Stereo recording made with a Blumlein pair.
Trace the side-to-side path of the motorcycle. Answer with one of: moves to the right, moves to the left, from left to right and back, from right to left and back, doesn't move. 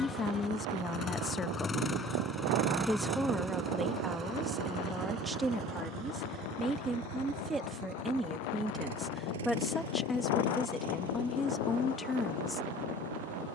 moves to the right.